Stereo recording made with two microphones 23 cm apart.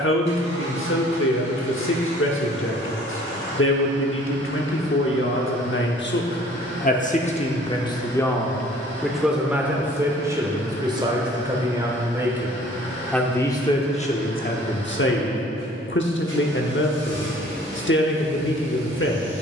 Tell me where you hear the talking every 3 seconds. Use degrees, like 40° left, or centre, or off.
60° left, 60° left, 30° left, 10° right, 20° left, 50° left, 50° left.